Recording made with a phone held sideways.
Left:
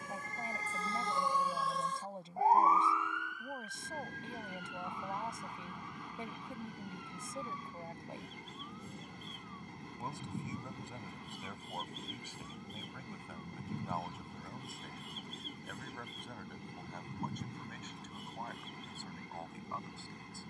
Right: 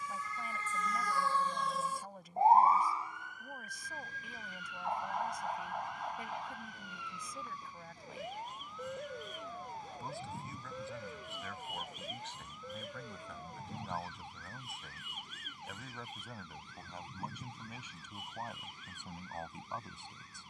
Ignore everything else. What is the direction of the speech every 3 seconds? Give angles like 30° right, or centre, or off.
30° left, 30° left, 30° left, 20° left, 10° left, 10° right, 20° right.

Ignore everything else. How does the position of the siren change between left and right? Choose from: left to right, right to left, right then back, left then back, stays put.
left to right.